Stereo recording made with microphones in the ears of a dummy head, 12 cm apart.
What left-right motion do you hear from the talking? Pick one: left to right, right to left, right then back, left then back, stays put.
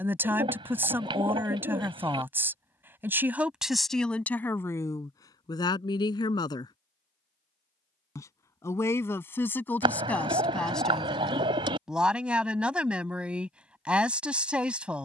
left then back.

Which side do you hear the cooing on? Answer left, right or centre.
right.